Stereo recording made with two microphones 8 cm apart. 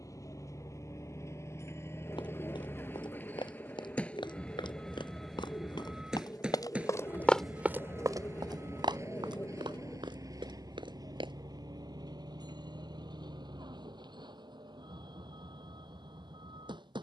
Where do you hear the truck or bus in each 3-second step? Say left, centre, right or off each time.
left, centre, right, right, right, right.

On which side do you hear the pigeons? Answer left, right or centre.
left.